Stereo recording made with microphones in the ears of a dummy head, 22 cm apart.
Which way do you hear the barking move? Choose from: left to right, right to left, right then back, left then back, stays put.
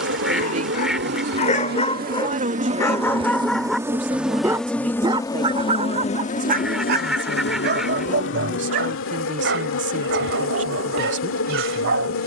left to right.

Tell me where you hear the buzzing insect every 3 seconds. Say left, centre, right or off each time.
right, centre, left, left.